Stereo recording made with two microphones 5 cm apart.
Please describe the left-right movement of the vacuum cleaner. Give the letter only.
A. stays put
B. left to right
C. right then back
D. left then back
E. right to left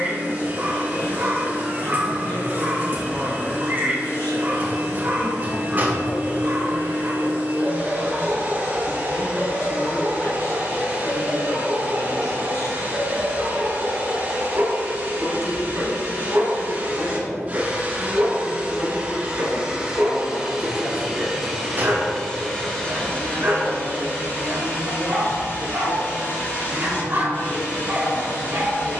E.